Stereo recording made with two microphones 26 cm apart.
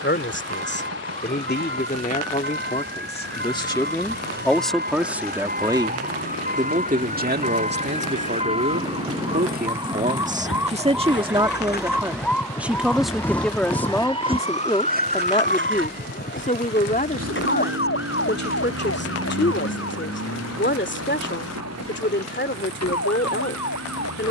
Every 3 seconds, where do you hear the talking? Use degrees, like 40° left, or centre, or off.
40° left, centre, 40° right, 30° right, centre, 30° left, 40° left, 40° left.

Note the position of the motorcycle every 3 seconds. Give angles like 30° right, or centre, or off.
80° left, 70° left, 70° left, 50° left, centre, 60° right, 70° right, 80° right.